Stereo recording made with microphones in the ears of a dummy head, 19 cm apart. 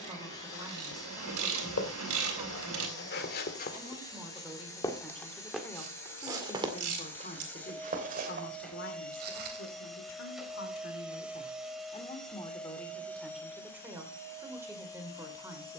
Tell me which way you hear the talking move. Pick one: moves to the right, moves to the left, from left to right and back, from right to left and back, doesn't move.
from right to left and back.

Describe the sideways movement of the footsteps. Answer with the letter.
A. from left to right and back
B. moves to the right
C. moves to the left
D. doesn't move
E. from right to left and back
B.